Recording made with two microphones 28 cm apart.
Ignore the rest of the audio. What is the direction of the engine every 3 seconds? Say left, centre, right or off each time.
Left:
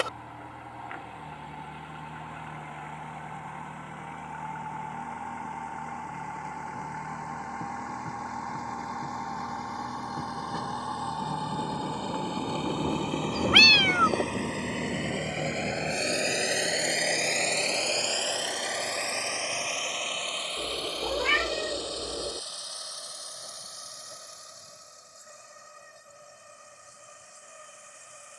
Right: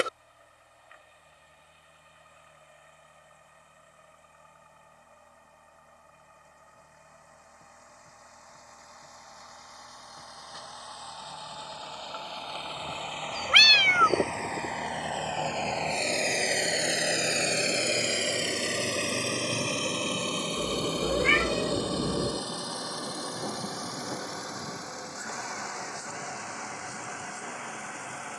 left, left, left, left, left, centre, right, right, right, right.